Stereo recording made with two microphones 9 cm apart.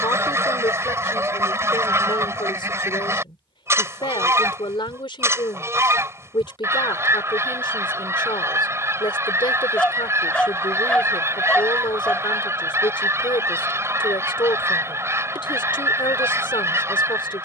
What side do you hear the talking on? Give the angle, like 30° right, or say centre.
60° left.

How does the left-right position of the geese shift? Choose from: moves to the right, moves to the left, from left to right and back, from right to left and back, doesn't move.
doesn't move.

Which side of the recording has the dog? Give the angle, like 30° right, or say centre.
10° left.